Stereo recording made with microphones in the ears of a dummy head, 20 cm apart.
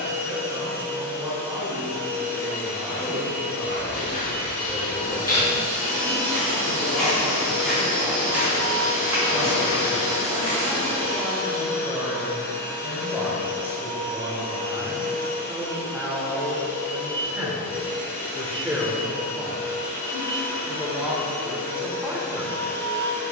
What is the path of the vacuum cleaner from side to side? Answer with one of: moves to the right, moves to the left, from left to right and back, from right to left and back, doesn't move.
doesn't move.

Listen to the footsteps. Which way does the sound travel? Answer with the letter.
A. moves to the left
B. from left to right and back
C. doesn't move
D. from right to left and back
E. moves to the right
E.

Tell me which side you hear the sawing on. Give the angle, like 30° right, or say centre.
30° right.